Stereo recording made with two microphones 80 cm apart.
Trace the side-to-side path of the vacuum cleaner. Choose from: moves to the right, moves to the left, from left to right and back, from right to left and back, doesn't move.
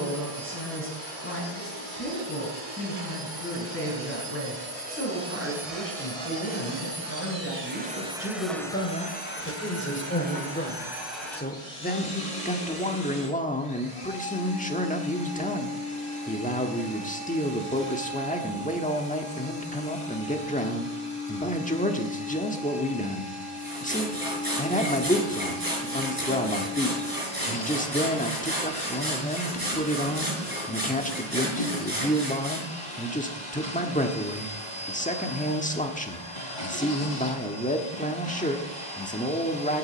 moves to the left.